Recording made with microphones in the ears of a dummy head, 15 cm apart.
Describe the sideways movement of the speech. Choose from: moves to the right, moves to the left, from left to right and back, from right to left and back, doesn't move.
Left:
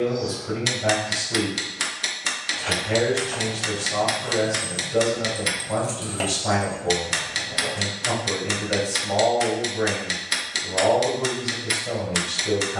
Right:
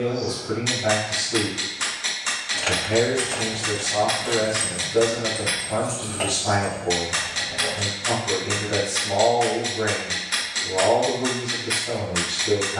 doesn't move.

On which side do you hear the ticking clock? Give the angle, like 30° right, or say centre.
70° left.